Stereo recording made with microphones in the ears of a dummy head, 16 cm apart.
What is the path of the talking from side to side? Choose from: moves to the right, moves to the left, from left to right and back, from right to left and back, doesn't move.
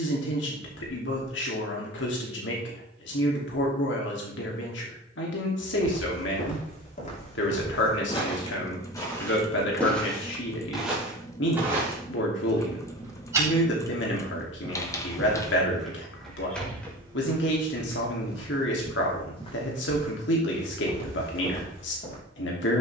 doesn't move.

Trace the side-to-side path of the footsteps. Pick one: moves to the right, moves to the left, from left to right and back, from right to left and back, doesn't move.
from left to right and back.